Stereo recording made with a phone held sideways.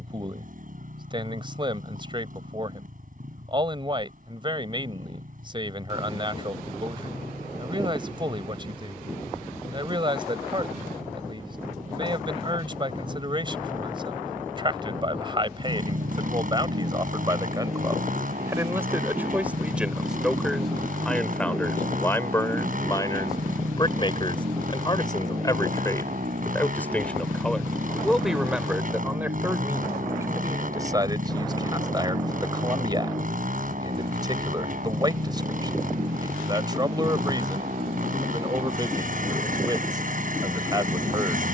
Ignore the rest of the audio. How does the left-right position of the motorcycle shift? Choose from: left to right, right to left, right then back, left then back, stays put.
stays put.